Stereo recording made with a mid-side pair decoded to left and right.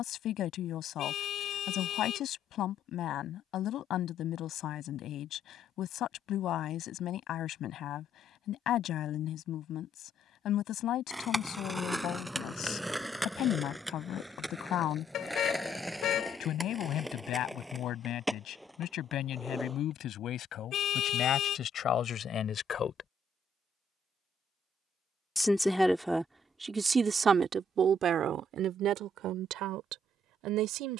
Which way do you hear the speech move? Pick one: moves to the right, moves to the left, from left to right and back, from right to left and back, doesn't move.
moves to the right.